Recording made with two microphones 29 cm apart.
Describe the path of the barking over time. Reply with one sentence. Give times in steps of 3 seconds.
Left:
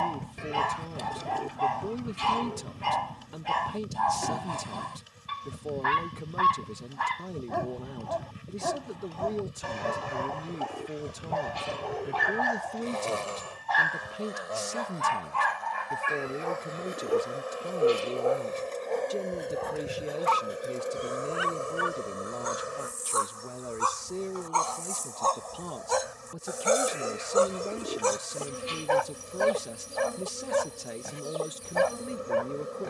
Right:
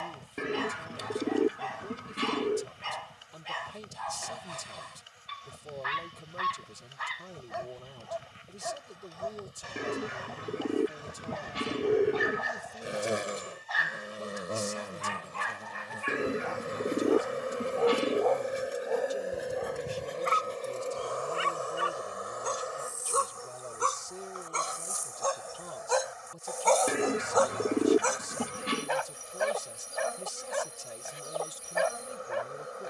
You can hear the barking on the left from 0 s, in the centre from 18 s, on the right from 21 s, in the centre from 24 s and on the left from 27 s.